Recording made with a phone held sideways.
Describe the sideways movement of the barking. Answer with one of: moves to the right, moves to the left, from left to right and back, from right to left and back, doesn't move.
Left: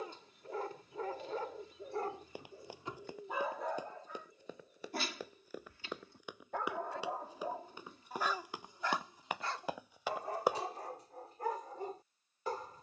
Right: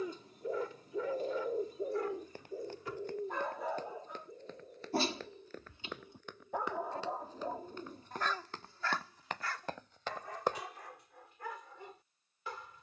from left to right and back.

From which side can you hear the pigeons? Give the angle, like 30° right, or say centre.
40° right.